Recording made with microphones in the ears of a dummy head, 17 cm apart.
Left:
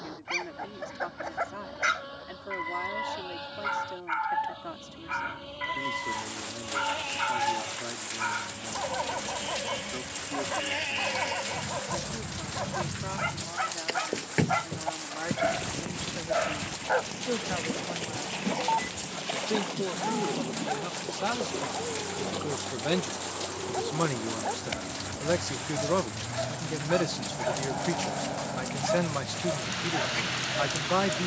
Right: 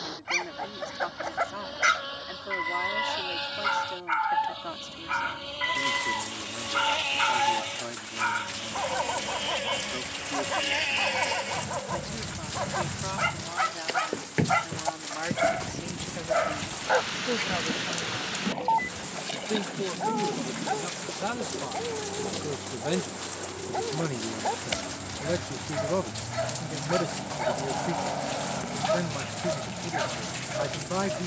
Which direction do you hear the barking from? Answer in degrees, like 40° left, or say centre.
20° right.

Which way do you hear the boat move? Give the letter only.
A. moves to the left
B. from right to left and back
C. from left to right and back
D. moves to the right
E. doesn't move
A.